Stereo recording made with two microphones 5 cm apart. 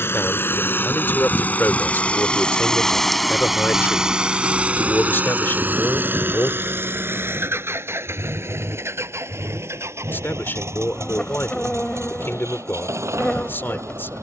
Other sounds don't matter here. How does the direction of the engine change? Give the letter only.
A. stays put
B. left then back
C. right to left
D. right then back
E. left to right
E.